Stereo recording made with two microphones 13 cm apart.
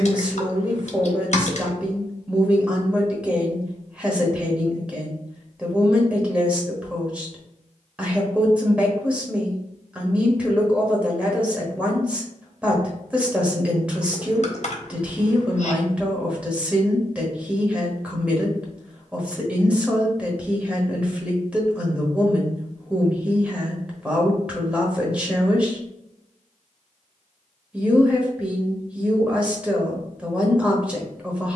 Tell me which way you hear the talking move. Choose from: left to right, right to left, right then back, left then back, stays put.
stays put.